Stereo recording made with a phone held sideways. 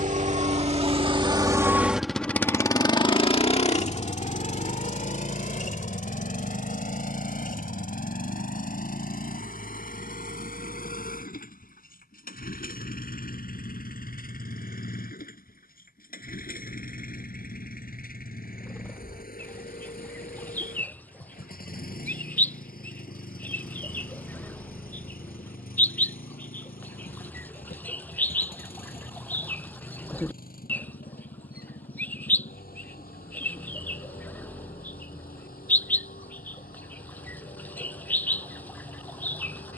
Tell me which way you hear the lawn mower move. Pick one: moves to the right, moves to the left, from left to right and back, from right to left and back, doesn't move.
moves to the left.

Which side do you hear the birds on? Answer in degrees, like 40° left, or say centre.
10° left.